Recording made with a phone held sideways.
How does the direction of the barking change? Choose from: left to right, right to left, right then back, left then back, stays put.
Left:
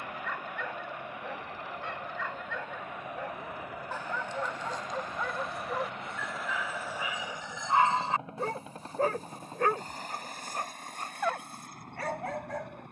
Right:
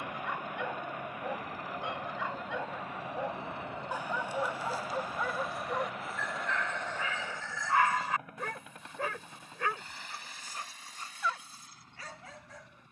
right to left.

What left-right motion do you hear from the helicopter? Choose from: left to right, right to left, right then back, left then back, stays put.
right to left.